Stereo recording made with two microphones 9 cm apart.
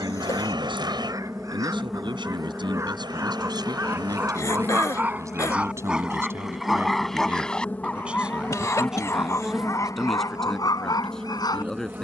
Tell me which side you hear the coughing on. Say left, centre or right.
left.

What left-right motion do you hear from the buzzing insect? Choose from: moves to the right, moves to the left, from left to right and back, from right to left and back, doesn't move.
from right to left and back.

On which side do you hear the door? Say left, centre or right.
right.